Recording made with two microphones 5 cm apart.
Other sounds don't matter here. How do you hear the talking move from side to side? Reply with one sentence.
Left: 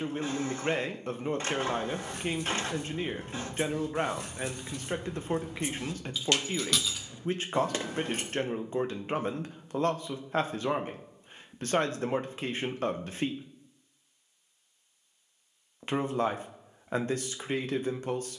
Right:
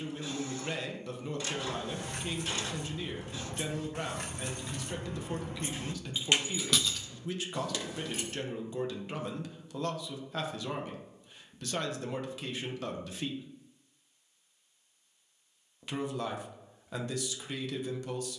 You can hear the talking stay put.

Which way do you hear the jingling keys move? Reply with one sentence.
You can hear the jingling keys move to the left.